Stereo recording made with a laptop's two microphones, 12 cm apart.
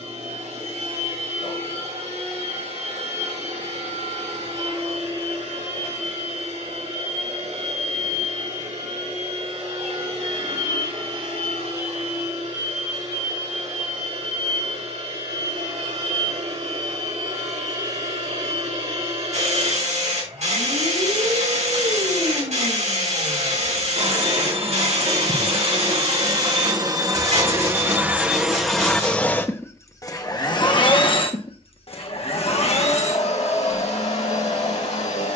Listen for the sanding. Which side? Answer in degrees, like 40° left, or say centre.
80° right.